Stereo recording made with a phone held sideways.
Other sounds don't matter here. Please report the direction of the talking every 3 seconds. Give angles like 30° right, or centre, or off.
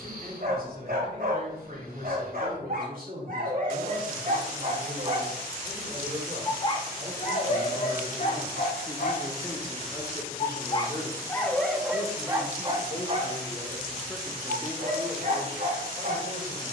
70° right, 60° right, 40° right, 20° left, 20° left, 60° right.